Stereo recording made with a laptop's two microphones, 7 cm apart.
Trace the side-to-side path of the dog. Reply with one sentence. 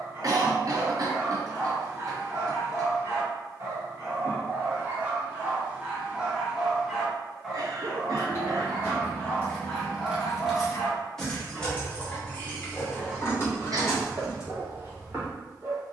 You can hear the dog move from right to left and back again.